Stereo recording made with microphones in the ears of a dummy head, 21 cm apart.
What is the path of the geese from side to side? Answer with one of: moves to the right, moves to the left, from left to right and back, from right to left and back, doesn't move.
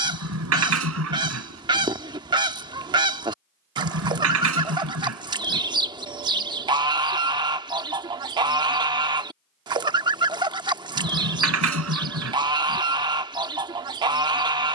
doesn't move.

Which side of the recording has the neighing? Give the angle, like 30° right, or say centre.
60° right.